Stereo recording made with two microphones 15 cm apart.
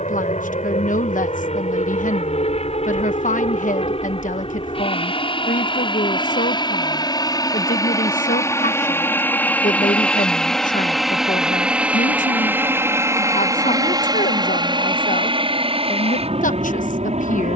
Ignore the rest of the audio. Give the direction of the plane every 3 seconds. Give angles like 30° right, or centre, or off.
50° left, 40° left, 30° left, centre, 20° right, 40° right.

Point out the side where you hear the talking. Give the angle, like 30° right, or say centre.
60° left.